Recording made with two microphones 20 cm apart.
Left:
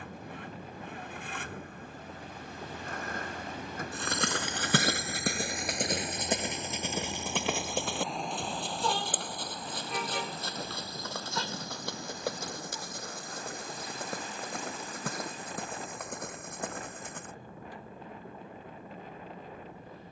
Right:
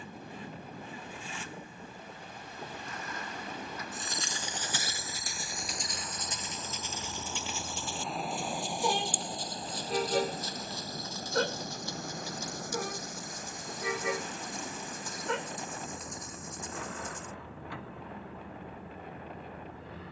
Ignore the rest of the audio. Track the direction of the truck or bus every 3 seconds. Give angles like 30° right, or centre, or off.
60° left, 40° left, 10° left, 40° right, 60° right, 80° right, 80° right.